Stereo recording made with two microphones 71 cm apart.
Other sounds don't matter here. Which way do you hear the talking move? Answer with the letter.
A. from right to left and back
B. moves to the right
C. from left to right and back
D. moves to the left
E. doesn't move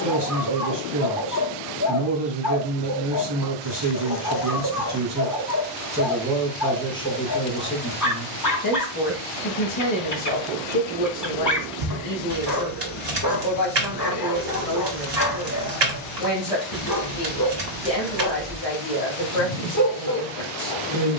D.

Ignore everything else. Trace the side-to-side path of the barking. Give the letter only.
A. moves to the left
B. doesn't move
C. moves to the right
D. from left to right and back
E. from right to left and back
B.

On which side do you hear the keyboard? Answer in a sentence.
You can hear the keyboard on the right.